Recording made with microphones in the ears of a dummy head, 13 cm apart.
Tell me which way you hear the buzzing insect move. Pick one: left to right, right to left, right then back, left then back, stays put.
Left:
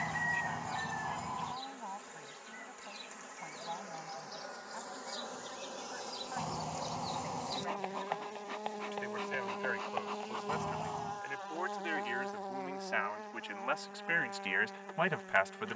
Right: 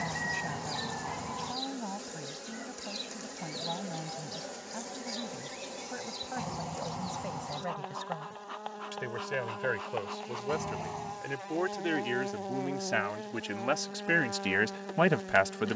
left then back.